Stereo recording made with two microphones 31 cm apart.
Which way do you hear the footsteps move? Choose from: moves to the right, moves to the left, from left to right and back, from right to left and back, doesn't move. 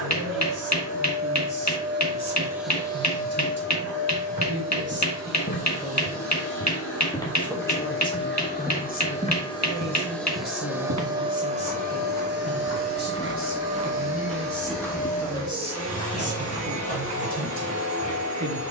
from left to right and back.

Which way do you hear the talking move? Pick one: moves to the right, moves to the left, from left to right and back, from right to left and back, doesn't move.
from right to left and back.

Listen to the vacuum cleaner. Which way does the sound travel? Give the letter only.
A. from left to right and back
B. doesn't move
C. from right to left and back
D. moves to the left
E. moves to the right
C.